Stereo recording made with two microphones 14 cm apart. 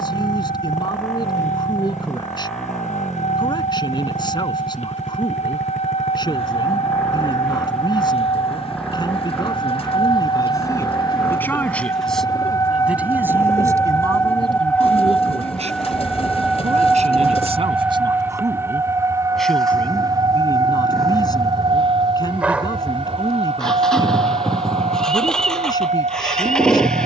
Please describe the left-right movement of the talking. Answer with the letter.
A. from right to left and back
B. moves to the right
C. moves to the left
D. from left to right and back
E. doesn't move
D.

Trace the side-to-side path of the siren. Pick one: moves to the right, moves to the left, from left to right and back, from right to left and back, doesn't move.
moves to the right.